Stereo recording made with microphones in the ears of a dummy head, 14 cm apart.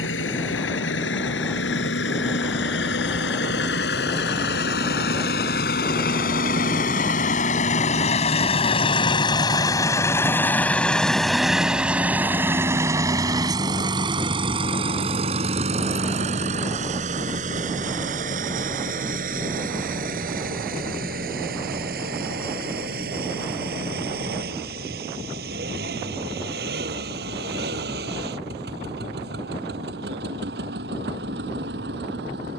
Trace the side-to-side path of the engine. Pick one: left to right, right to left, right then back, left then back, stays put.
left to right.